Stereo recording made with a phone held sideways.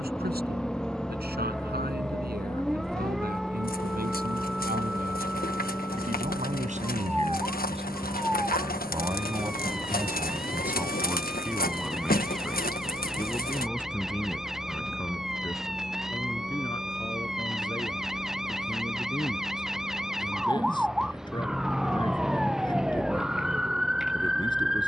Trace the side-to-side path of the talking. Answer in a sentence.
You can hear the talking travel towards the left.